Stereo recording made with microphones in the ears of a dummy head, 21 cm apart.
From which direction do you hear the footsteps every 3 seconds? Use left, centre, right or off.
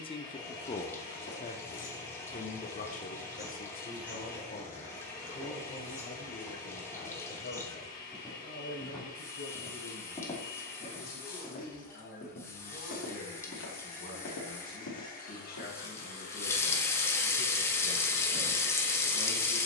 left, centre, centre, left, left, left, off.